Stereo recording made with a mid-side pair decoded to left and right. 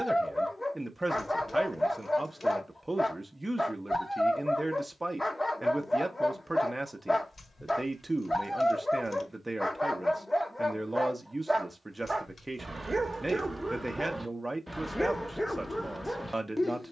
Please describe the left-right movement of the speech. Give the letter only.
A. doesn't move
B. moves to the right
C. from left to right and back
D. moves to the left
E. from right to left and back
A.